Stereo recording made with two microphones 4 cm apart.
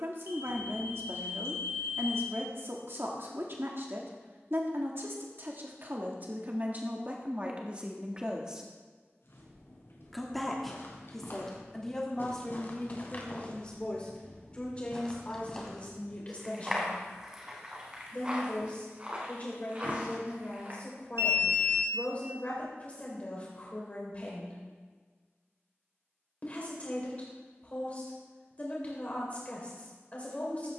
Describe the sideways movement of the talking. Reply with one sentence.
You can hear the talking travel towards the left.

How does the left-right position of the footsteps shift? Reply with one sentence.
You can hear the footsteps move from left to right.